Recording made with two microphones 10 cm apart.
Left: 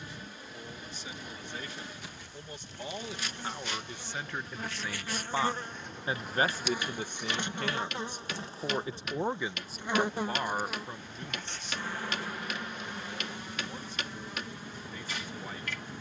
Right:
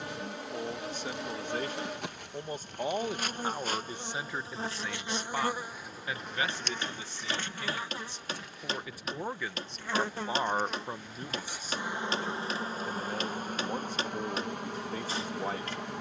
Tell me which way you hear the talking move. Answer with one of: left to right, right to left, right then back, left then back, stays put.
left then back.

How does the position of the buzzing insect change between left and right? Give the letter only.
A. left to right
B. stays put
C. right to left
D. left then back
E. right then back
D.